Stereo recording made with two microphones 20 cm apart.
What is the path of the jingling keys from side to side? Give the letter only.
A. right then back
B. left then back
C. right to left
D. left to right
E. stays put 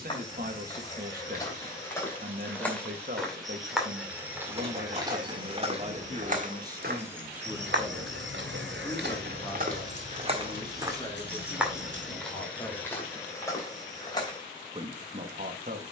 C.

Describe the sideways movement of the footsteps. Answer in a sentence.
In this clip you hear the footsteps go right and come back.